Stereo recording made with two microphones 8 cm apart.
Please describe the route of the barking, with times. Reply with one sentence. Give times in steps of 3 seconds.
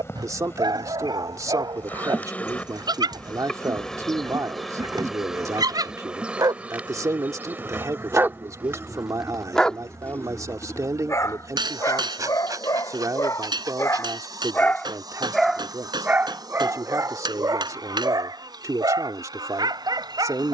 You can hear the barking on the right from 0 s, on the left from 9 s and on the right from 15 s.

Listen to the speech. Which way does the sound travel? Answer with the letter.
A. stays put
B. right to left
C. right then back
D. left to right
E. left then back
A.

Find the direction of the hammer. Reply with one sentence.
You can hear the hammer on the right.